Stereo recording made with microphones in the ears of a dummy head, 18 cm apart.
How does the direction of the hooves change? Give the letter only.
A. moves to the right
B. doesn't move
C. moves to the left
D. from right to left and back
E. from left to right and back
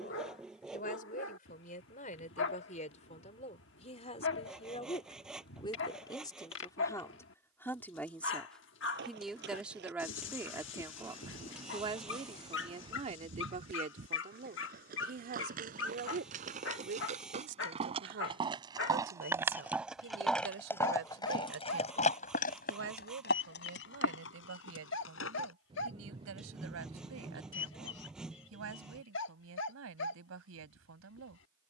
C.